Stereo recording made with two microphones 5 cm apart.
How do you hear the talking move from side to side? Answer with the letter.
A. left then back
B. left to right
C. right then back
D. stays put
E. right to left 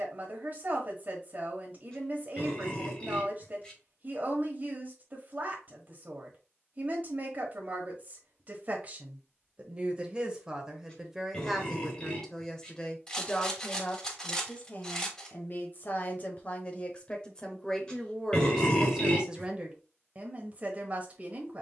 A.